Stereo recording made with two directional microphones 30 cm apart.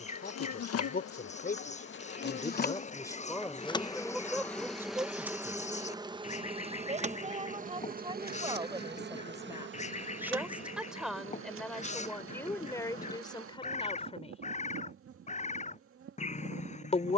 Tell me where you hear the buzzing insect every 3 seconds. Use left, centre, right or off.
left, centre, right, right, right, right.